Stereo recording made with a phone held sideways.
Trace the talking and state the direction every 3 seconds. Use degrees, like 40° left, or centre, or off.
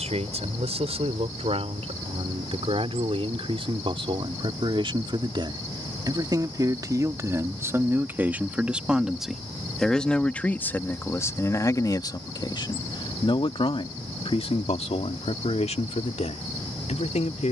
50° right, 40° right, 20° right, 10° left, 40° left, 60° left.